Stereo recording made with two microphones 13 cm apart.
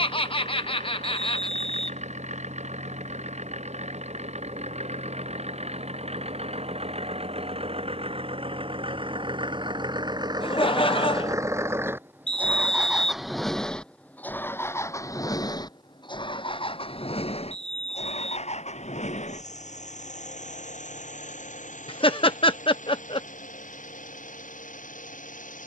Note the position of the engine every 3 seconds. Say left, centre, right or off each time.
right, right, right, right, centre, left, left, left, left.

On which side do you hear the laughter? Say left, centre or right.
left.